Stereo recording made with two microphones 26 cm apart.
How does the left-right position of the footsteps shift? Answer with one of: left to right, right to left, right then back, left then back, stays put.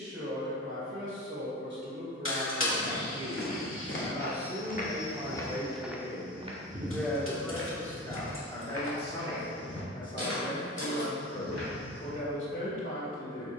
left to right.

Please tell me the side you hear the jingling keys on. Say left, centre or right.
left.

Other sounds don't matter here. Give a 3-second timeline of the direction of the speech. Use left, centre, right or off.
right, right, centre, left, left.